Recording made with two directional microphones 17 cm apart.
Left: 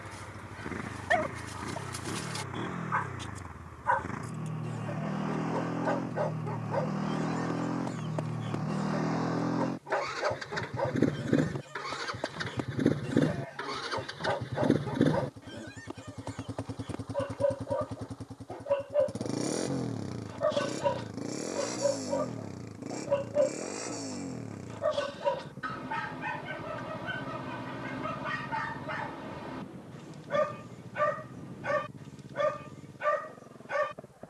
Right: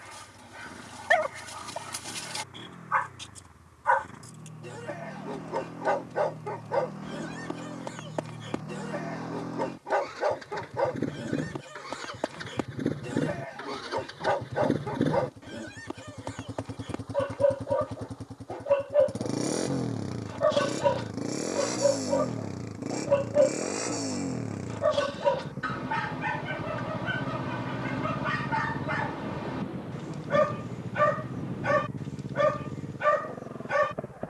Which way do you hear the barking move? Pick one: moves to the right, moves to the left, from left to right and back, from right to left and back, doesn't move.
doesn't move.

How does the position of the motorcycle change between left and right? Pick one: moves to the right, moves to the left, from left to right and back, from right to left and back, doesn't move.
moves to the right.